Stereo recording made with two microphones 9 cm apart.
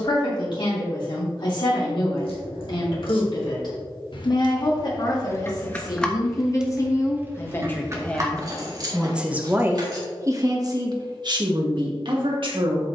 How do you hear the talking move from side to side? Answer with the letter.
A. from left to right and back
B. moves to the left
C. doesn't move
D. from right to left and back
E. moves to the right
E.